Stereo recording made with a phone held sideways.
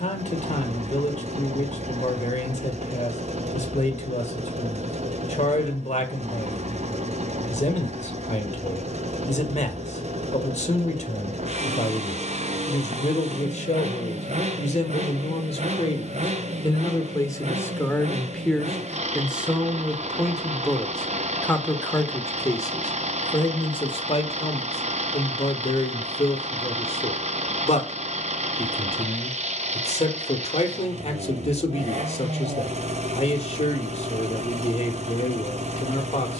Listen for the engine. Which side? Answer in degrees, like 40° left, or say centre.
60° right.